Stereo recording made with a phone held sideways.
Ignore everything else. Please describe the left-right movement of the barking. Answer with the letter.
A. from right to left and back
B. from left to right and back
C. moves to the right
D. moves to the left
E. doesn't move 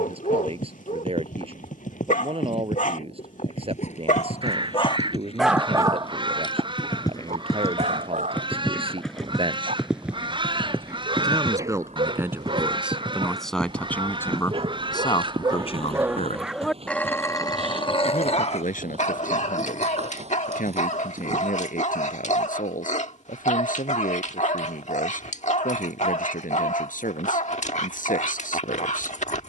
B.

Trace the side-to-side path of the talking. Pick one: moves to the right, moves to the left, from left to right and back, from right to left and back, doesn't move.
moves to the left.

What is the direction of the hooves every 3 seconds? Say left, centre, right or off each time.
left, left, left, centre, right, right, right, right, off, off.